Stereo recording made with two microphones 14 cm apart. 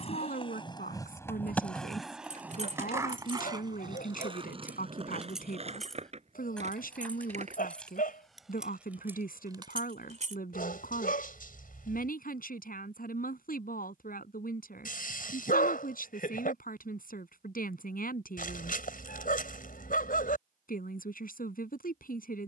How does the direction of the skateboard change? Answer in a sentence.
You can hear the skateboard go from the left side to the right.